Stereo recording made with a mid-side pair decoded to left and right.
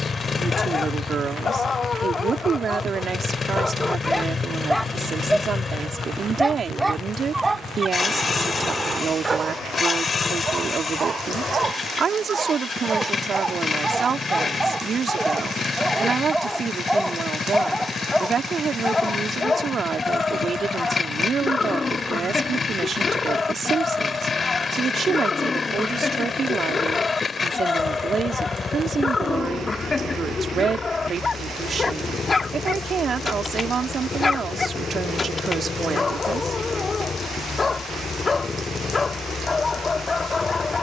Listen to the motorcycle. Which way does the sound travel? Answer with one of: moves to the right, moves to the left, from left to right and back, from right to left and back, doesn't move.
doesn't move.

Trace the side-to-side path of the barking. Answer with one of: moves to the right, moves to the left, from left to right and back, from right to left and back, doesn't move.
from left to right and back.